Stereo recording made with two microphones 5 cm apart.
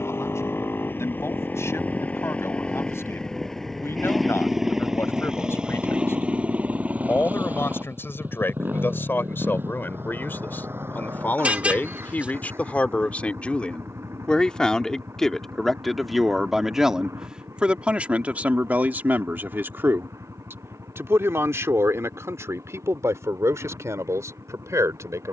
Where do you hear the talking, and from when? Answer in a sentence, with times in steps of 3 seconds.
You can hear the talking on the left from 0 s, in the centre from 15 s and on the right from 18 s.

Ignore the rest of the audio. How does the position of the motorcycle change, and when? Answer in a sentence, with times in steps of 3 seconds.
In this clip you hear the motorcycle on the left from 0 s, in the centre from 3 s and on the right from 6 s.